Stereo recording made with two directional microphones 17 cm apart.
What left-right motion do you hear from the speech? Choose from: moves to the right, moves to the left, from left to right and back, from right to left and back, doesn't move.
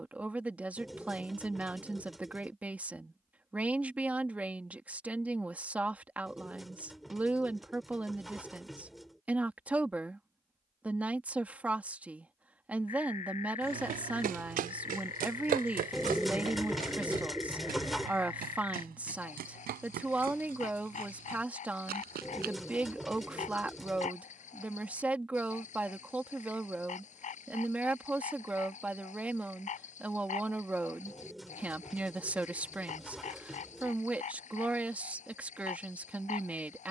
doesn't move.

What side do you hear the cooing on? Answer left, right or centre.
centre.